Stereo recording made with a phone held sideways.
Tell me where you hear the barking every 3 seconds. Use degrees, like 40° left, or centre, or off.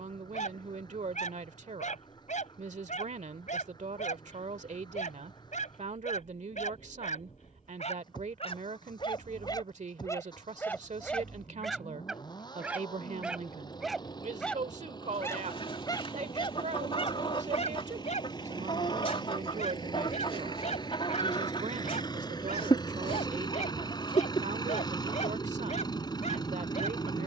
60° left, 60° left, 50° left, 20° left, centre, 30° left, 50° left, 50° left, 50° left.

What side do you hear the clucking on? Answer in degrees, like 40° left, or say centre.
40° left.